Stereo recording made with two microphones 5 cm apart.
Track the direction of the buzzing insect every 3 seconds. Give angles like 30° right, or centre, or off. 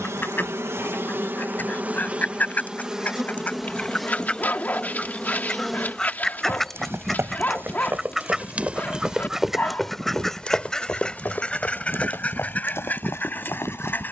40° right, centre, 20° right, 50° right, 60° right.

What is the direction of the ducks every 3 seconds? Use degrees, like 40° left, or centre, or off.
40° left, 20° left, centre, 10° left, 40° left.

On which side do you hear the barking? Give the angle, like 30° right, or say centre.
40° left.